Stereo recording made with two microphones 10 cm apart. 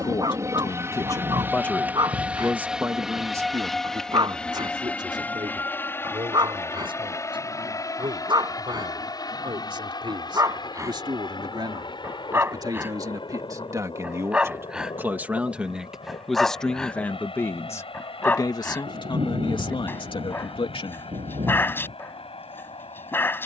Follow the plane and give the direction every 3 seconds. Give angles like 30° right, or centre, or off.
20° right, 10° left, 30° left, 40° left, 50° left, 60° left, 60° left, 60° left.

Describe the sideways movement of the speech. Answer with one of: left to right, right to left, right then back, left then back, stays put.
right then back.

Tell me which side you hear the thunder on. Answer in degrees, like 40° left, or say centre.
80° right.